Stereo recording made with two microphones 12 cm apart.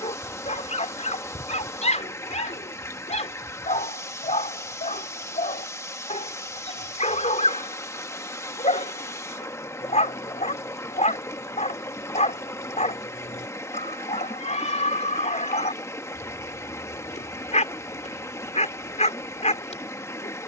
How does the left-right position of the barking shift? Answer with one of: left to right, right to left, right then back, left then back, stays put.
stays put.